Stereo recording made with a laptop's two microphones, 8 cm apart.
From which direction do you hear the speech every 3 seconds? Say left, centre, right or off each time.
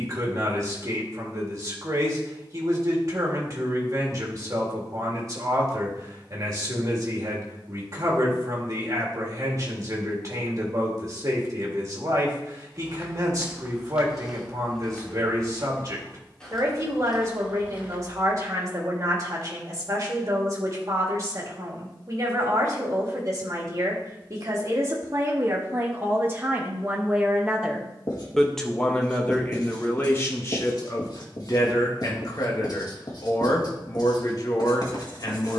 right, right, right, right, right, right, right, right, right, centre, left, left.